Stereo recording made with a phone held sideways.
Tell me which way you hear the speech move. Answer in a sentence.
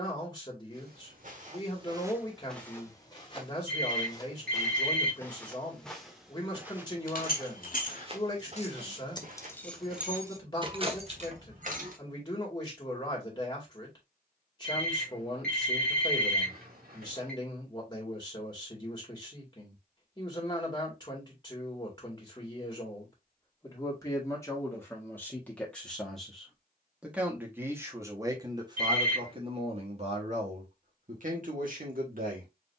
In this clip you hear the speech travel towards the right.